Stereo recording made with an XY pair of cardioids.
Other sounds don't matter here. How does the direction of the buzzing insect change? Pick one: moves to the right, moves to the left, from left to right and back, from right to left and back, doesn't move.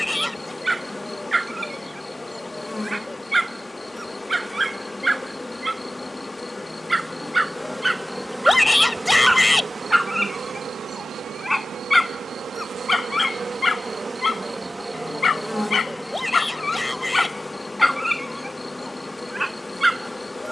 from left to right and back.